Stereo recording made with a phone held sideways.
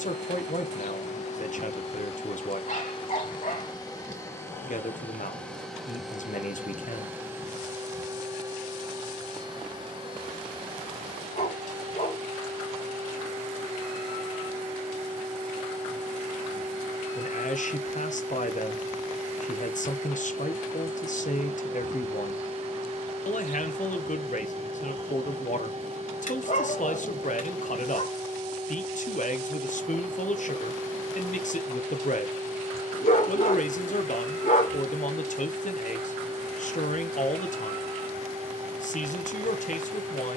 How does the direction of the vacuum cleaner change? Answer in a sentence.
You can hear the vacuum cleaner travel towards the right.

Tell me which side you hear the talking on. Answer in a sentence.
You can hear the talking on the left.